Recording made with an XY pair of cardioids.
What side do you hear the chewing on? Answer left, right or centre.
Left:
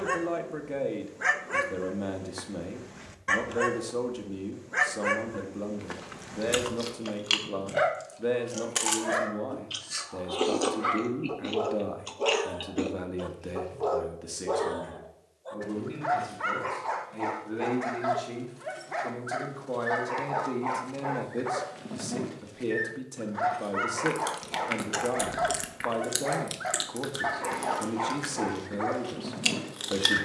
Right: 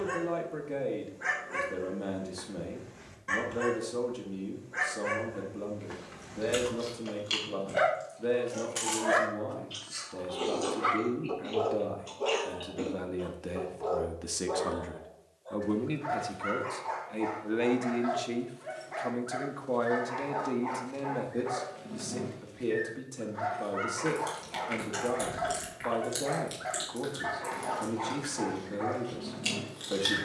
left.